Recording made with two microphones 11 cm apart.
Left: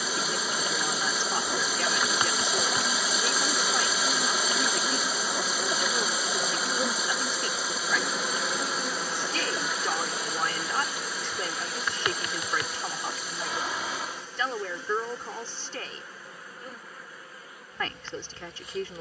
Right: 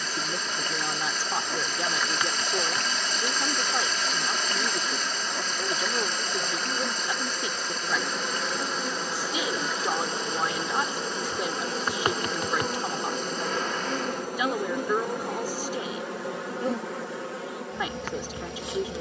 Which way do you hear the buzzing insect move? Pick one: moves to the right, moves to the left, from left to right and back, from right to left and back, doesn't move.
moves to the right.